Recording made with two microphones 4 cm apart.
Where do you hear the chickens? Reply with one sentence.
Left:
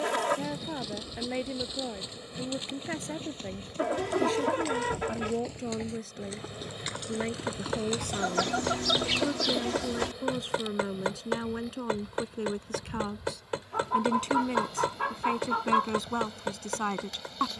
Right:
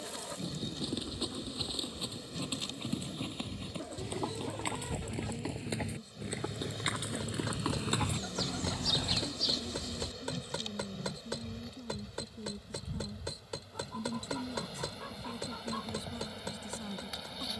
You can hear the chickens on the left.